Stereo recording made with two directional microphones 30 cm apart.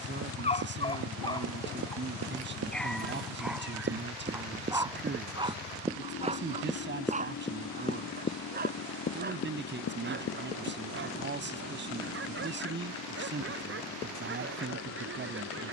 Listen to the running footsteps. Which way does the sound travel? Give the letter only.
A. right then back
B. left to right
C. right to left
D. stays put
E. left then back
C.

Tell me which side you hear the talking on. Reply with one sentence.
You can hear the talking on the right.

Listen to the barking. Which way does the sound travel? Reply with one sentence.
In this clip you hear the barking move from left to right.